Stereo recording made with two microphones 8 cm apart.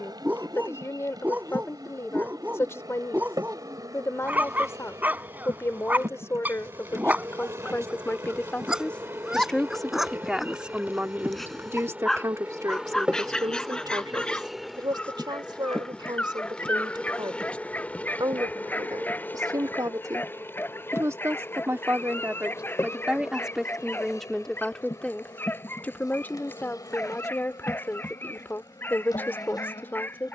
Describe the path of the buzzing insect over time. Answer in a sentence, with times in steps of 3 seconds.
In this clip you hear the buzzing insect on the right from 0 s, in the centre from 12 s and on the left from 18 s.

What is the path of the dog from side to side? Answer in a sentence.
You can hear the dog move from right to left.